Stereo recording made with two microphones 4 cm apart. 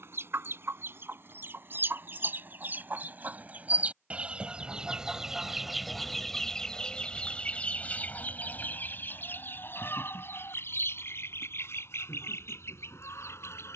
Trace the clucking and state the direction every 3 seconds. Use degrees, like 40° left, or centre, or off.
50° right, 20° right, 30° left, 60° left, 70° left.